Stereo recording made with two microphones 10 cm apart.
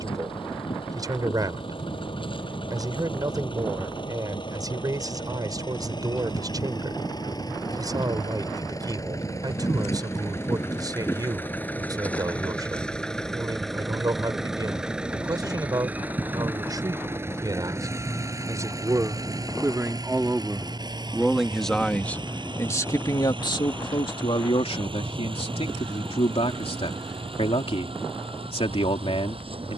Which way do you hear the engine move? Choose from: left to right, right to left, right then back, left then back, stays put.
left to right.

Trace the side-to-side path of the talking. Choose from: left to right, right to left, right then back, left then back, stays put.
right to left.